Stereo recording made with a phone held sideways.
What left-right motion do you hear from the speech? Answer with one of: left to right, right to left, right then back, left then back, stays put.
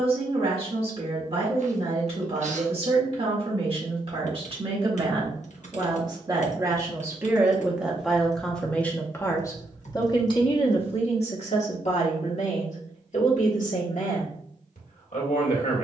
right to left.